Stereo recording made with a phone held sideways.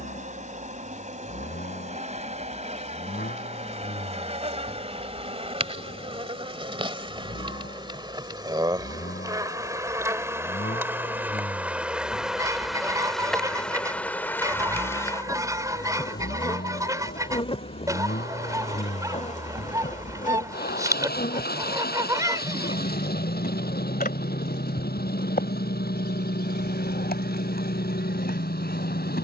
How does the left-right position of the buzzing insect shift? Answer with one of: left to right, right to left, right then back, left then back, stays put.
right to left.